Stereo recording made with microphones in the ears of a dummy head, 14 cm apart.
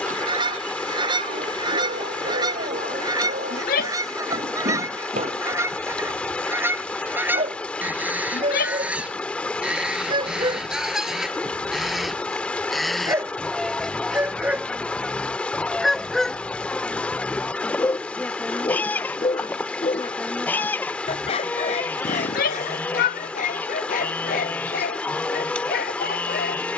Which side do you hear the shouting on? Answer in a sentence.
In this clip you hear the shouting on the left.